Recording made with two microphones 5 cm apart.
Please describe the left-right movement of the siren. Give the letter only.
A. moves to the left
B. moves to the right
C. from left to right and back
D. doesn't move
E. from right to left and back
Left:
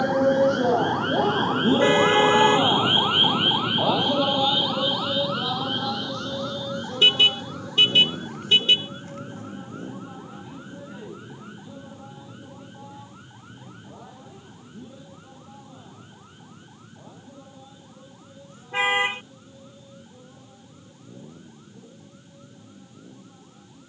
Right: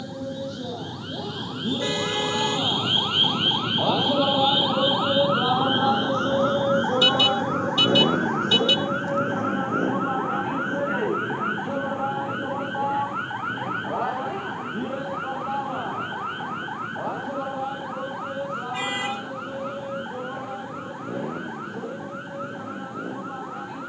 B.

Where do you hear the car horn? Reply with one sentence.
In this clip you hear the car horn on the left.